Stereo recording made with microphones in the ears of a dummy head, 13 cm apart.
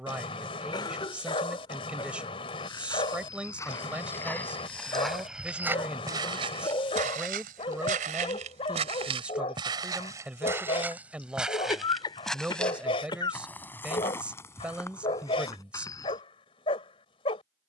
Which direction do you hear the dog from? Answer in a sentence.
In this clip you hear the dog on the left.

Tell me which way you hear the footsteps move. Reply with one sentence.
In this clip you hear the footsteps go right and come back.